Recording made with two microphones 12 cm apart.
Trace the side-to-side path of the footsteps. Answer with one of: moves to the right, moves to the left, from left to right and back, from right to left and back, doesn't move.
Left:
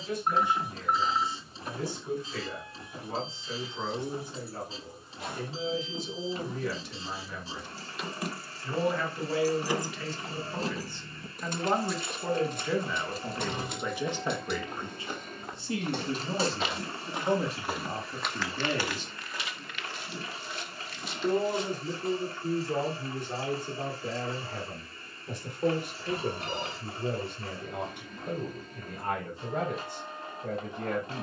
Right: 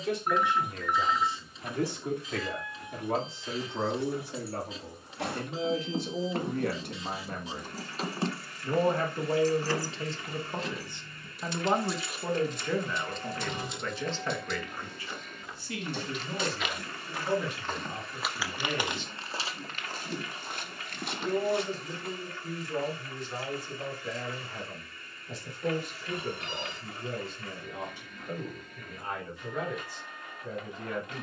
moves to the right.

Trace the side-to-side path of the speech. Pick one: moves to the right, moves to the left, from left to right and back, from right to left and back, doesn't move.
moves to the left.